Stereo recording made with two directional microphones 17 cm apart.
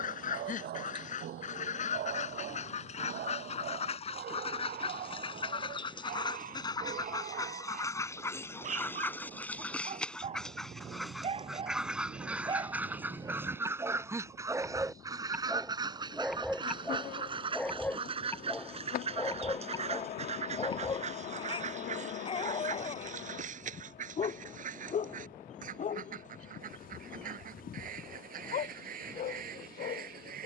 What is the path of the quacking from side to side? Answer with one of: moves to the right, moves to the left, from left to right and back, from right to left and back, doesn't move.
moves to the right.